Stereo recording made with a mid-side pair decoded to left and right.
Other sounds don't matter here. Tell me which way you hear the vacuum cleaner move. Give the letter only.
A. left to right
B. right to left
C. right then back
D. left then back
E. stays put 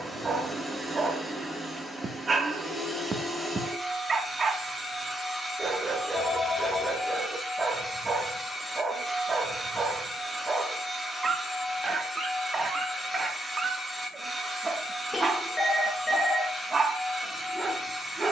E.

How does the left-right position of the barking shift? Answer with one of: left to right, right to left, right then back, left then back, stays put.
stays put.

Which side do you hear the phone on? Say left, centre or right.
centre.